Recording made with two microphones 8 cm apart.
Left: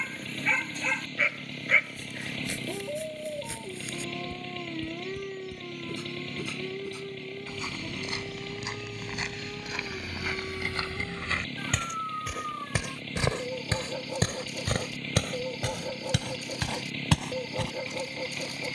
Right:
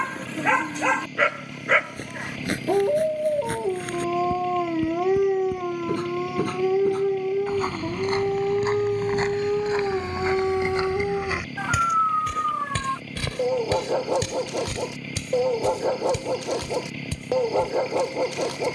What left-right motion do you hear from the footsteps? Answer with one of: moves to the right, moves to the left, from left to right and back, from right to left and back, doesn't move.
moves to the left.